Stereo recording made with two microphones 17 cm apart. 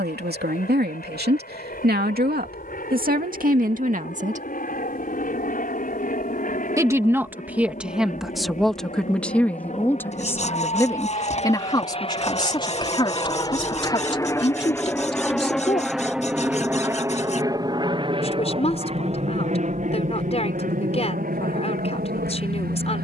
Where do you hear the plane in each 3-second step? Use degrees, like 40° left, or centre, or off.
70° left, 60° left, 60° left, 50° left, 30° left, 10° right, 40° right, 60° right.